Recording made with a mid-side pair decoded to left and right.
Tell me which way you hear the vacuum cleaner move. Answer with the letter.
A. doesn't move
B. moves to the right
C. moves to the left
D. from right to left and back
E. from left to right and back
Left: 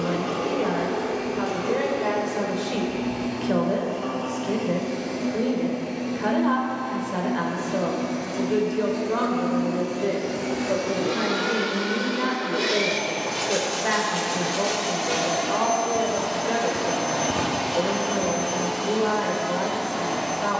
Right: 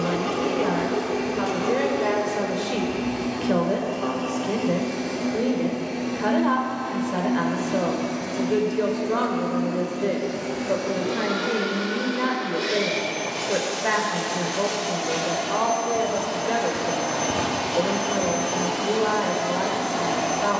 D.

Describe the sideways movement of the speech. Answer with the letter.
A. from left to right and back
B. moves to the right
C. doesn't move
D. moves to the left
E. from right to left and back
C.